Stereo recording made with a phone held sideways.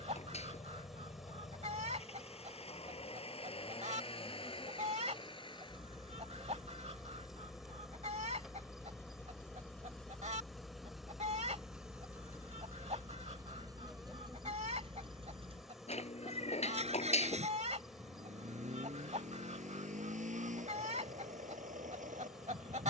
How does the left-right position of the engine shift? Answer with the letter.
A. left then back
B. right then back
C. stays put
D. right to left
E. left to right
E.